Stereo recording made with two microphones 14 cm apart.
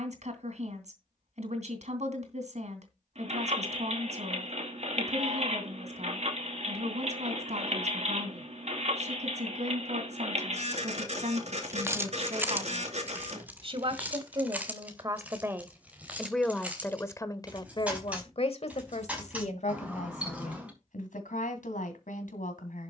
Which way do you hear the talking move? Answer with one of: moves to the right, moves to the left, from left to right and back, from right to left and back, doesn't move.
moves to the left.